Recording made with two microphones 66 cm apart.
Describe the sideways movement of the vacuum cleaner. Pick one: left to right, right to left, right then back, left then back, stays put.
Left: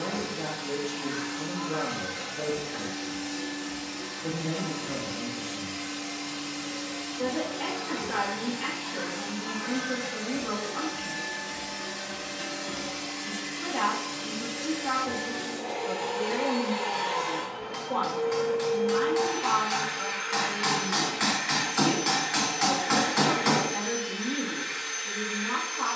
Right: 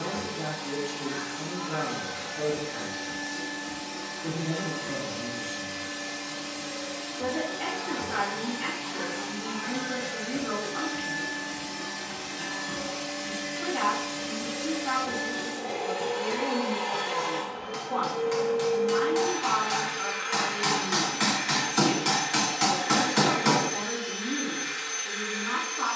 left to right.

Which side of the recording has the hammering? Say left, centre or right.
right.